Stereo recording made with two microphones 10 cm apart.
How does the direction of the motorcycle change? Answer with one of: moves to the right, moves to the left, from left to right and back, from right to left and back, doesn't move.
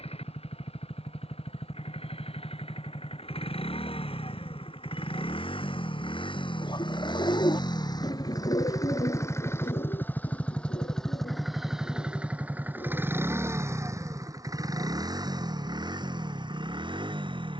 moves to the right.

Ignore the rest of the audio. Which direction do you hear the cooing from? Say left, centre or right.
left.